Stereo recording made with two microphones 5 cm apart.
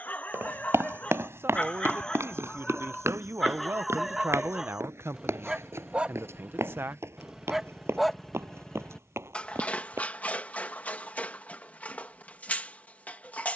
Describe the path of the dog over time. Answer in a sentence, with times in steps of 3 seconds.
In this clip you hear the dog on the left from 0 s, in the centre from 3 s and on the left from 9 s.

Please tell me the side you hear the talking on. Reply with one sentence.
In this clip you hear the talking on the right.